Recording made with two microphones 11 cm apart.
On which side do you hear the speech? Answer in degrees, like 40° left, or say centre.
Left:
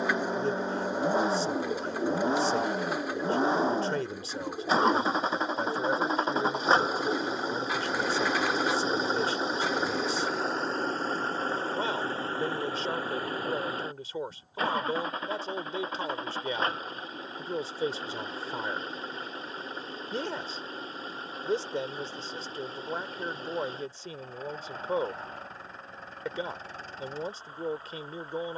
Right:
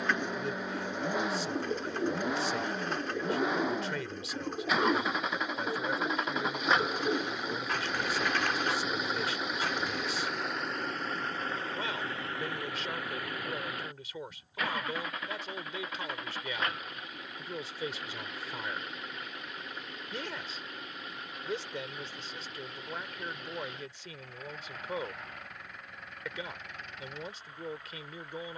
30° left.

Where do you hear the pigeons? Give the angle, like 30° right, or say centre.
10° left.